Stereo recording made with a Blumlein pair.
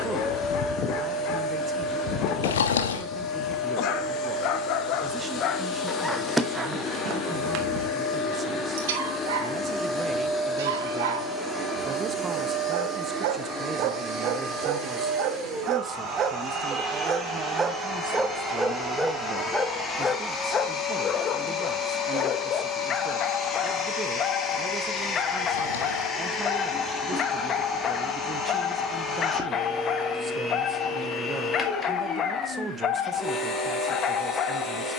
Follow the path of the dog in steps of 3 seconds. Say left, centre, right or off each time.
left, left, right, right, right, right, centre, left, left, left, left, left.